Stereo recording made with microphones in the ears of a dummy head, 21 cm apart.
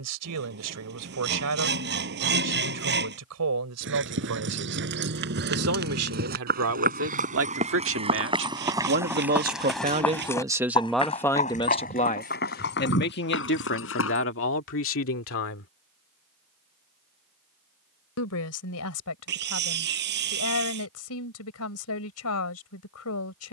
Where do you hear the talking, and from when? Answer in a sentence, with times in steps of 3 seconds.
In this clip you hear the talking on the right from 0 s, in the centre from 9 s and on the left from 12 s.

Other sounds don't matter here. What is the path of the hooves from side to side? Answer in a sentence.
In this clip you hear the hooves move from right to left.